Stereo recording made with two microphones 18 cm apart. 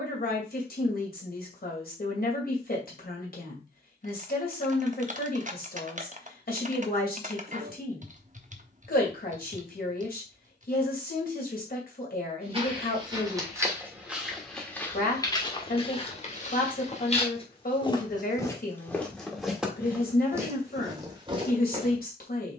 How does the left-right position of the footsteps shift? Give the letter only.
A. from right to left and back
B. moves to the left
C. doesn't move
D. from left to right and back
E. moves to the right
A.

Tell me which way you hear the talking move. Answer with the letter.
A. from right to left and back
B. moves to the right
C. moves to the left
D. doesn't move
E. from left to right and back
D.